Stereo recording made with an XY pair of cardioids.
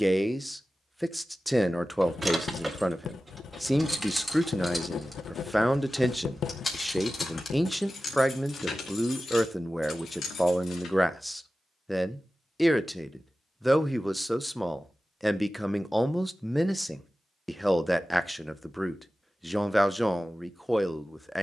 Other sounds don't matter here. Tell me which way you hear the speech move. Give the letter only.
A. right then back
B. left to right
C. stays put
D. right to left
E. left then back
C.